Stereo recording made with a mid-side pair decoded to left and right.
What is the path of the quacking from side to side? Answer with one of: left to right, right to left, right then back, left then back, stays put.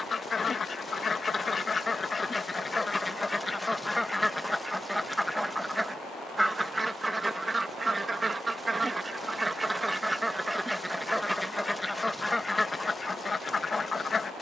right then back.